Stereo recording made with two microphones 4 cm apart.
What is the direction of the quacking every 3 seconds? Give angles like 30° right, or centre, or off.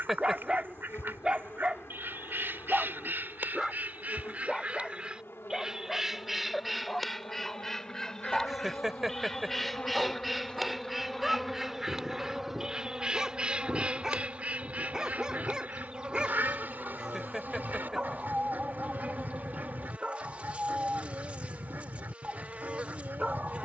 60° right, 40° right, 10° left, centre, 30° right, 50° right, 50° right, 50° right.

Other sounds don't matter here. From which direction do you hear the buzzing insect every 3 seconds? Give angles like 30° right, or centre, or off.
80° left, 80° left, 60° left, 20° left, 20° right, 30° right, 30° right, 30° right.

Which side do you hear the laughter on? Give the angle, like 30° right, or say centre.
10° right.